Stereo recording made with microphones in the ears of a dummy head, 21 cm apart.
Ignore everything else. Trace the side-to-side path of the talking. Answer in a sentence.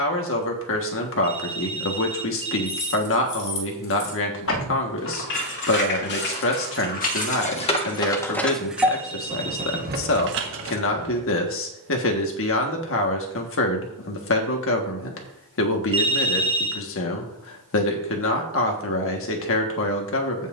In this clip you hear the talking stay in one place.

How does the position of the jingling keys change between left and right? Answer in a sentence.
You can hear the jingling keys go from the left side to the right.